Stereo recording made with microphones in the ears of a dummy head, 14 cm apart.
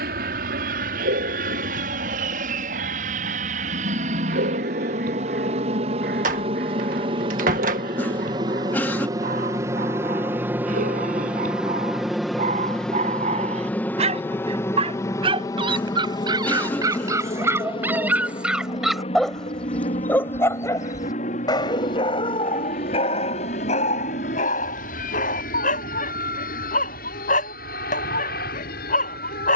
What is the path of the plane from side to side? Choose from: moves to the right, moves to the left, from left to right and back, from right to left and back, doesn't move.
moves to the left.